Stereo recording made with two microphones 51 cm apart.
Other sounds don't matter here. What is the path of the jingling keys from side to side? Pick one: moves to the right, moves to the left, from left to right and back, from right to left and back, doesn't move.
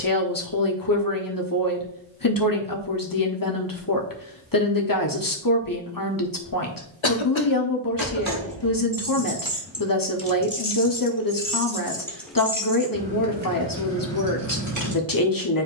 from right to left and back.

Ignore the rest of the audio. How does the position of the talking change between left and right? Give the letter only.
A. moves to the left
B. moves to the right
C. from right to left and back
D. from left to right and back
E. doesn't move
E.